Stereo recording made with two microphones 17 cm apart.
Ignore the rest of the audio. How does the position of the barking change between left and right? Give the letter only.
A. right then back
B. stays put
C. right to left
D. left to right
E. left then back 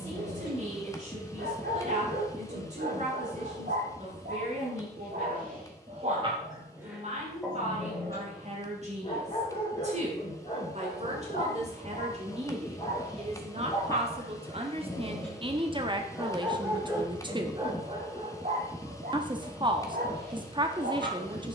E.